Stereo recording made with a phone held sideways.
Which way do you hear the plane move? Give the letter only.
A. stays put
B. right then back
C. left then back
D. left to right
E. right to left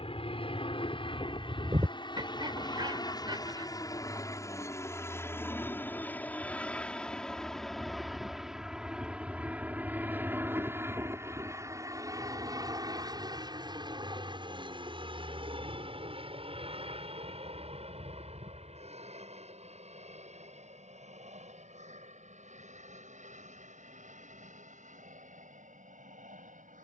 D.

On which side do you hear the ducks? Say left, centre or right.
right.